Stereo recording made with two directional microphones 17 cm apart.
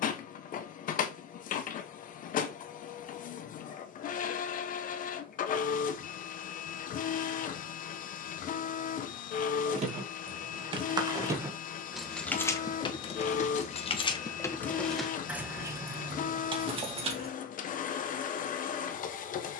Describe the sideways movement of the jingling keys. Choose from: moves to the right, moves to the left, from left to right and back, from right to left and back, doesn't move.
from right to left and back.